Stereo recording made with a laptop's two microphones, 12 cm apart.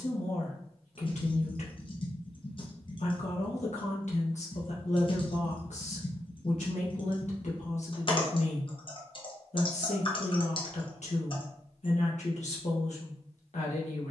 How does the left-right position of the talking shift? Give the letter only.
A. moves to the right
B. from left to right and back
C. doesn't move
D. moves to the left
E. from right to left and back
C.